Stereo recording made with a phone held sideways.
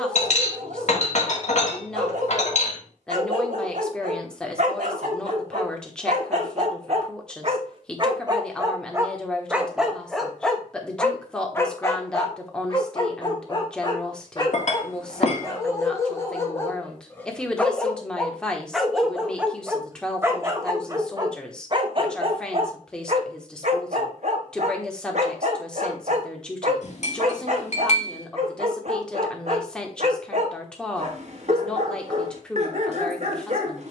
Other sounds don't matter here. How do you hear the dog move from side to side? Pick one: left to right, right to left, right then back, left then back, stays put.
left then back.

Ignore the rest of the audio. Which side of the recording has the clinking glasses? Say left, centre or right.
left.